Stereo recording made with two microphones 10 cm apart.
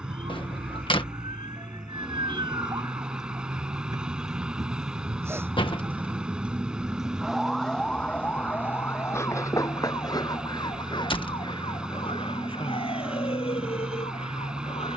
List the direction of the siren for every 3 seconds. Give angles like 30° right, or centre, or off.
50° right, 30° right, centre, 40° left, 60° left.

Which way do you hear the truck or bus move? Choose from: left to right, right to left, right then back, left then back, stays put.
stays put.